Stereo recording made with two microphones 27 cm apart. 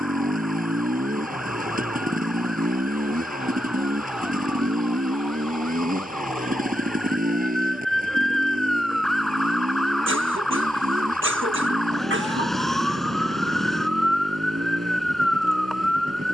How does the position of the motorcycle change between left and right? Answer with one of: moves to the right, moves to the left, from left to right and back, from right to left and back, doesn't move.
doesn't move.